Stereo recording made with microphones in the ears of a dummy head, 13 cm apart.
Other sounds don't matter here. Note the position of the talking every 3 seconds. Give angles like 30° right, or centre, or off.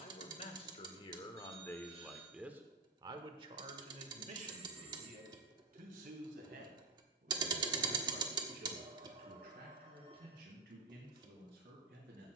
30° left, 50° right, 70° right, 80° right.